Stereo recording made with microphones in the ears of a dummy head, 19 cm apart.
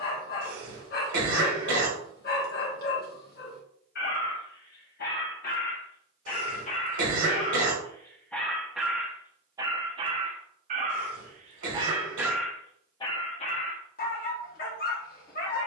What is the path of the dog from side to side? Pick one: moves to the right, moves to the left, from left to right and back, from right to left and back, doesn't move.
from left to right and back.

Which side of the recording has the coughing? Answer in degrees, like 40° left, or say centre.
70° right.